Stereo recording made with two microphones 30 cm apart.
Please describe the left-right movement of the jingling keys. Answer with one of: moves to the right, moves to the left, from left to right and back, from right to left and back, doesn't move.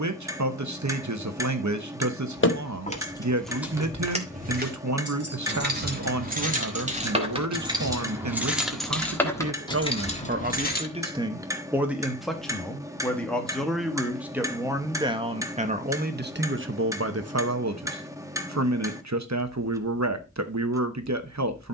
from left to right and back.